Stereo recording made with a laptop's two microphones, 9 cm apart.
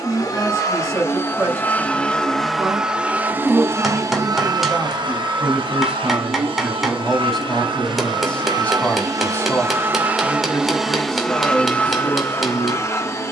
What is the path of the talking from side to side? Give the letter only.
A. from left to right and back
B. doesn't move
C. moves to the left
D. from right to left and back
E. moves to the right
C.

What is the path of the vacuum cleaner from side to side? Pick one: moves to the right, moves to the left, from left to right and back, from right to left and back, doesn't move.
from left to right and back.